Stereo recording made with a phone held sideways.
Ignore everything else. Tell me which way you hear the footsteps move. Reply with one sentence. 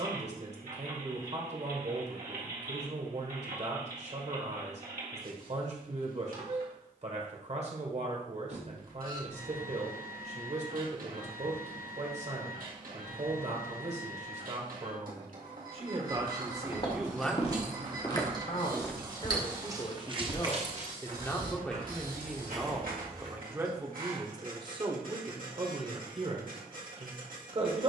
You can hear the footsteps travel towards the right.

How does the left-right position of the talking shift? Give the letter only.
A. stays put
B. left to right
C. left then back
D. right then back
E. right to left
C.